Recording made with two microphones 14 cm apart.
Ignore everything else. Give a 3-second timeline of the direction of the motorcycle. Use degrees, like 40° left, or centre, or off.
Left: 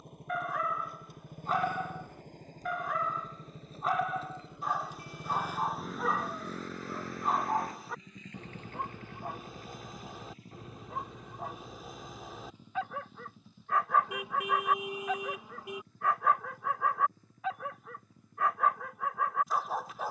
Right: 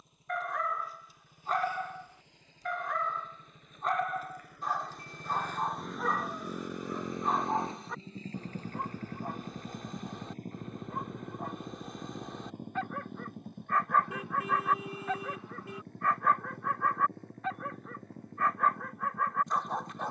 60° left, 20° left, 20° right, 50° right, 60° right, 70° right, 70° right.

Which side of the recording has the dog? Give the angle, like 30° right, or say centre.
centre.